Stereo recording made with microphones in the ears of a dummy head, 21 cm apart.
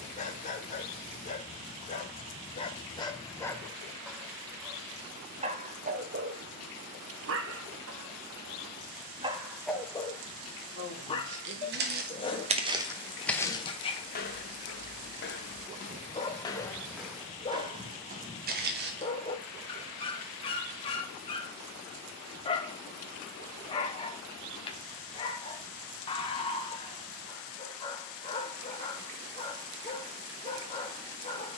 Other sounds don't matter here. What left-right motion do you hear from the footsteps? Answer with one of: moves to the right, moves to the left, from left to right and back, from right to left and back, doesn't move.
from right to left and back.